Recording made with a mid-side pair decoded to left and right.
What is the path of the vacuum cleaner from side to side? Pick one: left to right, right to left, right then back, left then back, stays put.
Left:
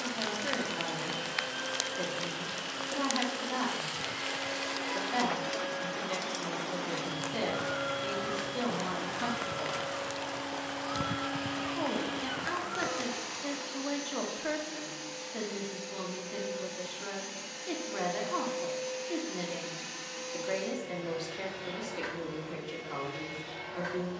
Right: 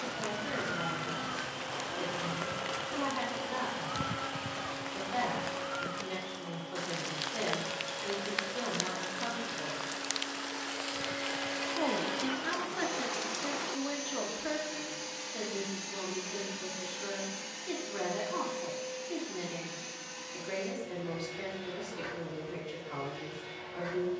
right then back.